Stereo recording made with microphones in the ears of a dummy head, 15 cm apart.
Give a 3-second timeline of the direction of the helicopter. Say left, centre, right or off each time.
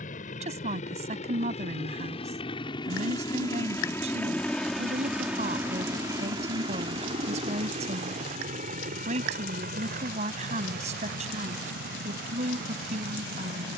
left, centre, right, right, right.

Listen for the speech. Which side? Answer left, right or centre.
right.